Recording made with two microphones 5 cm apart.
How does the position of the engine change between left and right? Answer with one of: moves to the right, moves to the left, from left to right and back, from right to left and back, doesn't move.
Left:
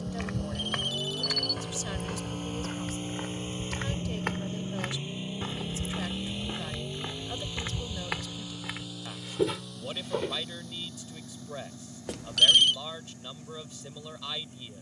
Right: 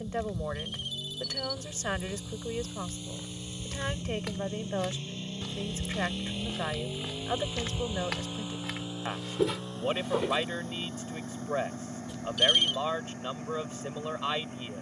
moves to the right.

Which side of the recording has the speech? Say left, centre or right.
right.